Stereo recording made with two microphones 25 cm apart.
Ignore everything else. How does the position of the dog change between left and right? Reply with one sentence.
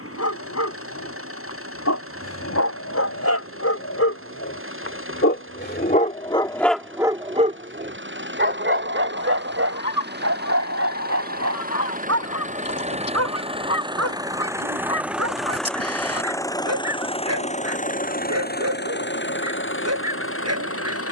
You can hear the dog go from the left side to the right.